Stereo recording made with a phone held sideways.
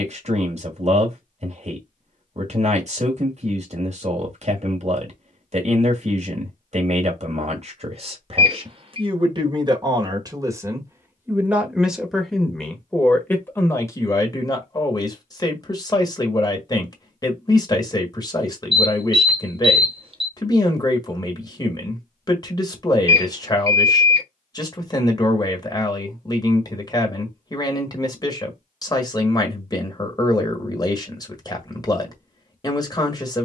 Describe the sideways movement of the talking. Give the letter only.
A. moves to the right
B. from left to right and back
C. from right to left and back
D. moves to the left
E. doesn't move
D.